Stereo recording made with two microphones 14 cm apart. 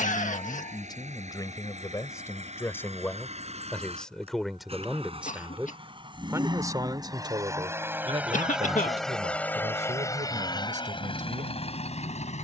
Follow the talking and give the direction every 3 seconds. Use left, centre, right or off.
left, centre, right, right.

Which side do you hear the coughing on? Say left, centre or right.
left.